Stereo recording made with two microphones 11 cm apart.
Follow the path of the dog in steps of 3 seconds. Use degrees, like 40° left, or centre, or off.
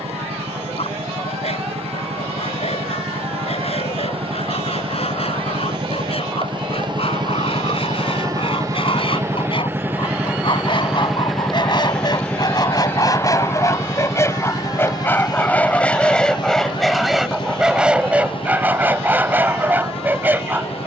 70° left, 70° left, 60° left, 50° left, 30° left, centre, 20° right.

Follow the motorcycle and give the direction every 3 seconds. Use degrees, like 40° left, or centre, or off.
70° right, 60° right, 40° right, 10° right, 20° left, 40° left, 50° left.